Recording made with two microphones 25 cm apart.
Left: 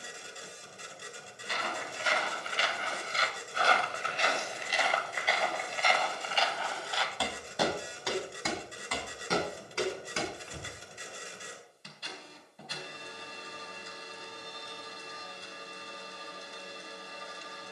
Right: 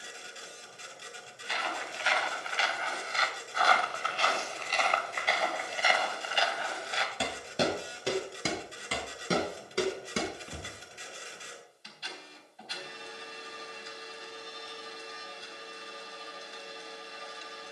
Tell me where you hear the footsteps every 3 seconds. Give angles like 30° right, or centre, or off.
50° left, 10° left, 20° right, 40° right, off, off.